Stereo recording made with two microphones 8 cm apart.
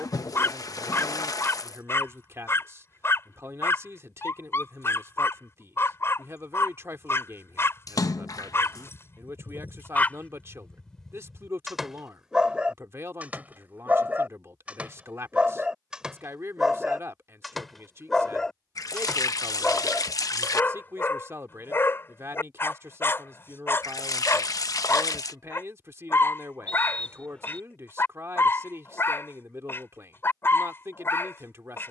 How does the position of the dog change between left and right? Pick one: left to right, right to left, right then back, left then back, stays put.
right then back.